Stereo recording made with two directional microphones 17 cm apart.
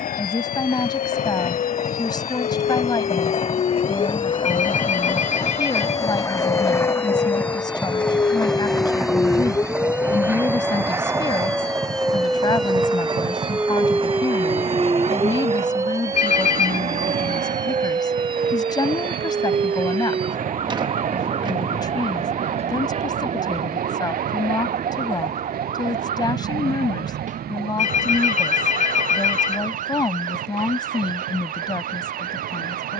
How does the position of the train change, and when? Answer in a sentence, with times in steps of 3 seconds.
You can hear the train on the left from 0 s, in the centre from 6 s and on the right from 12 s.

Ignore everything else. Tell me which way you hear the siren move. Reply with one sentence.
You can hear the siren go from the left side to the right.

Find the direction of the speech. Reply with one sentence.
You can hear the speech on the left.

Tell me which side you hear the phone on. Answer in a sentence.
In this clip you hear the phone on the left.